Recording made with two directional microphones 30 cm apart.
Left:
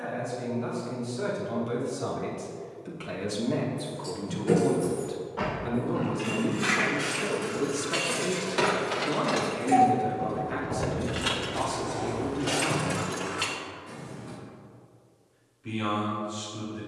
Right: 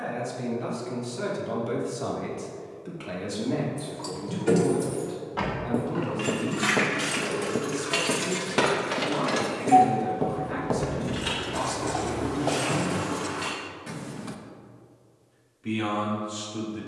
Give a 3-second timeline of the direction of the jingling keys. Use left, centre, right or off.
off, right, right, centre, left, off.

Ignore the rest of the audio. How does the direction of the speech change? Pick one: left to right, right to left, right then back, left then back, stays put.
left then back.